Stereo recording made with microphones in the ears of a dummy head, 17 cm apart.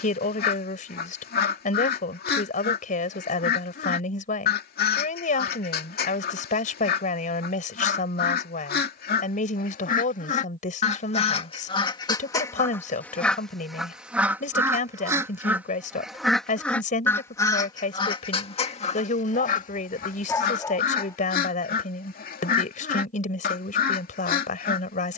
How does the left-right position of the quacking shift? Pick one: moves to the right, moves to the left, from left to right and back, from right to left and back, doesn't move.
from left to right and back.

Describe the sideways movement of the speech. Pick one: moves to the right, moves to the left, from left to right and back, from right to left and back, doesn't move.
doesn't move.